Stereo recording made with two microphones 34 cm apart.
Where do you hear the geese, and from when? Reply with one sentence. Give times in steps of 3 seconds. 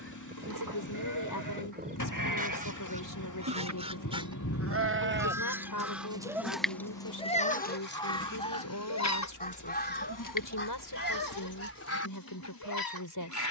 You can hear the geese on the right from 0 s, in the centre from 3 s and on the left from 9 s.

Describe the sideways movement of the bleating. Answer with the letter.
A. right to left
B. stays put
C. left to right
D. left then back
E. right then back
A.